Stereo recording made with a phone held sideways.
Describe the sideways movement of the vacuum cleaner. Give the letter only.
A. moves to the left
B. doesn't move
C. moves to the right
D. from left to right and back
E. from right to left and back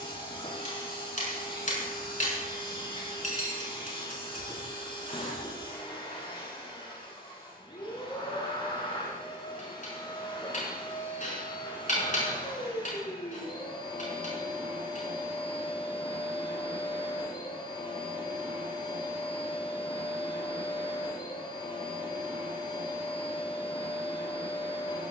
B.